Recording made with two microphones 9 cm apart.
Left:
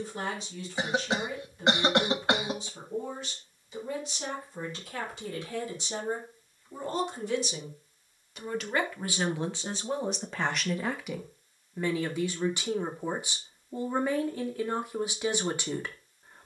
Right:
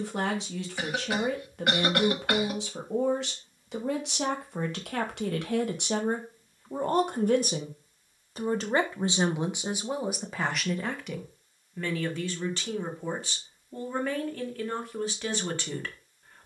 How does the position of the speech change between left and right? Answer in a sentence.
In this clip you hear the speech go from the right side to the left.